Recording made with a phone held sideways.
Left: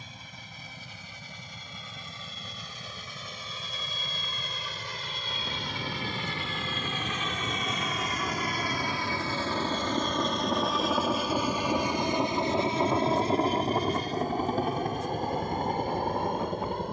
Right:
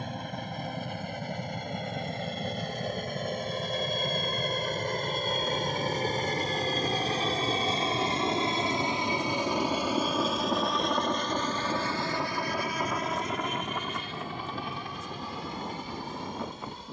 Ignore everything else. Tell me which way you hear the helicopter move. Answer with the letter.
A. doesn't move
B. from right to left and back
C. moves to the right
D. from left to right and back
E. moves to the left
E.